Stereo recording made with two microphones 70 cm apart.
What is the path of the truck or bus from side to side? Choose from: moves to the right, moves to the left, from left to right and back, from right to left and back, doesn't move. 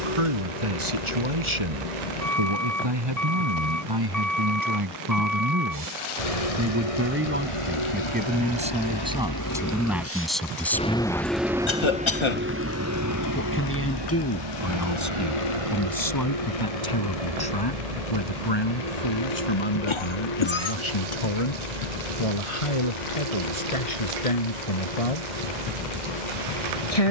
moves to the right.